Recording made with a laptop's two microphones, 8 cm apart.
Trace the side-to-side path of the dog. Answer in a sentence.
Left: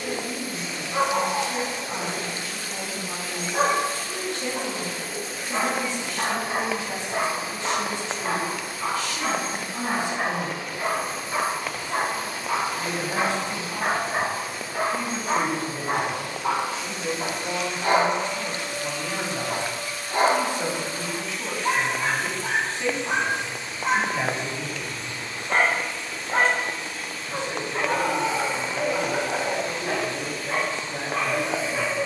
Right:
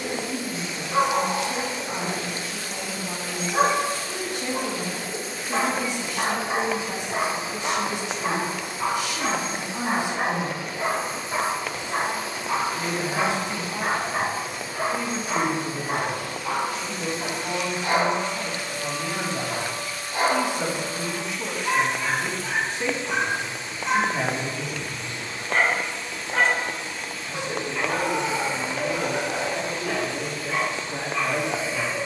You can hear the dog move from right to left.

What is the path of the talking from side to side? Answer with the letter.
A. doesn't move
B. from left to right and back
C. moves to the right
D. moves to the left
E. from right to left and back
A.